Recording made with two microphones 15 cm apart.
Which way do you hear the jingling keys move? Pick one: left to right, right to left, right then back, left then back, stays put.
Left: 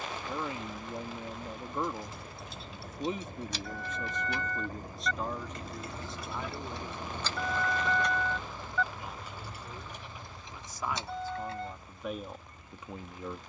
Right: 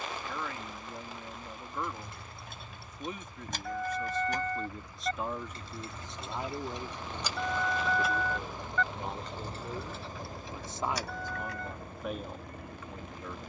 right to left.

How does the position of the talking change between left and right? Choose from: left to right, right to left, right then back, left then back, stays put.
right then back.